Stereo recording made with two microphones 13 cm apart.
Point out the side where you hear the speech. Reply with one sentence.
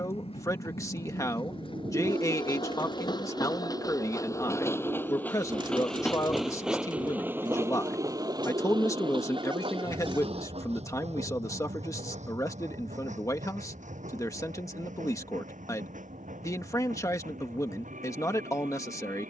In this clip you hear the speech on the left.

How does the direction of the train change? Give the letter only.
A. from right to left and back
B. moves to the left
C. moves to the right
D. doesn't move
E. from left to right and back
C.